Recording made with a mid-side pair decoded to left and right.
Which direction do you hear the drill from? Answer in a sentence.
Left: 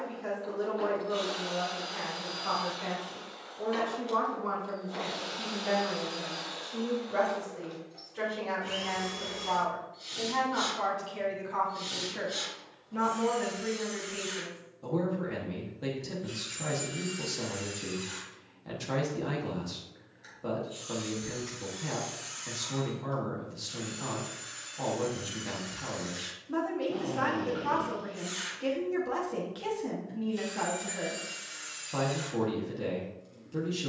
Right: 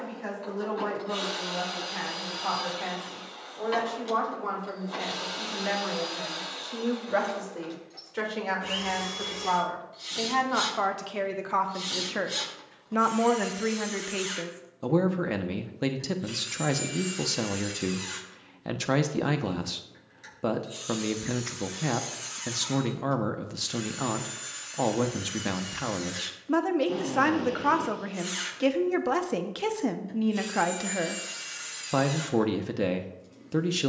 In this clip you hear the drill on the right.